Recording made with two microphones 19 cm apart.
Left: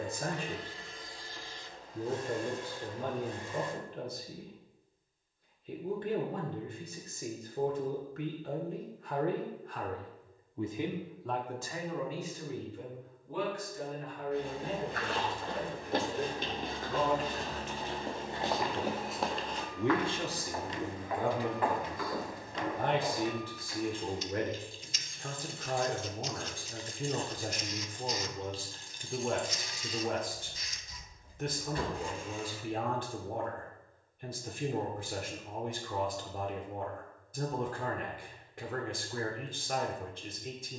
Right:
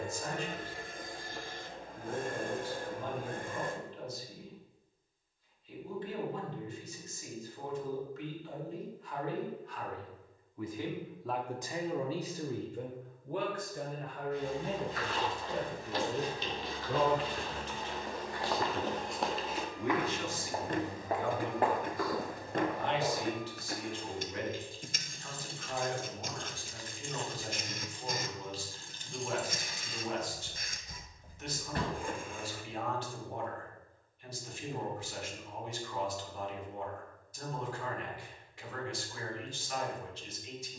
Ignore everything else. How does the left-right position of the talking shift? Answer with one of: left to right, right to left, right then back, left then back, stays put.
right then back.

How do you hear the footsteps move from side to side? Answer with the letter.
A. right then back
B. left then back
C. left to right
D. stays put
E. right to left
C.